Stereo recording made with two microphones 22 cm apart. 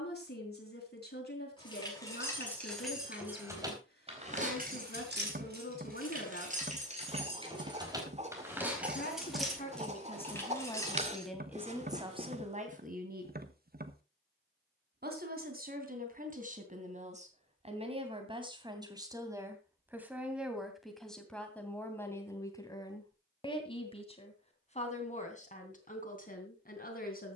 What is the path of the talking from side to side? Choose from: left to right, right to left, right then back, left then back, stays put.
right then back.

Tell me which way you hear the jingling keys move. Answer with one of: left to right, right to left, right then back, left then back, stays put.
right then back.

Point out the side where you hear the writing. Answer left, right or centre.
right.